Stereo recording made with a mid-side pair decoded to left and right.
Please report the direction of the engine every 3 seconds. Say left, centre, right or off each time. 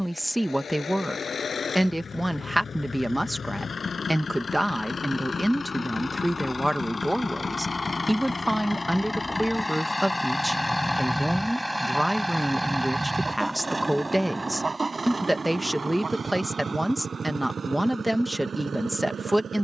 left, left, left, centre, right, right, right.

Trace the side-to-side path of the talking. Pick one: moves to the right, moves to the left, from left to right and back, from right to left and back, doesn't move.
doesn't move.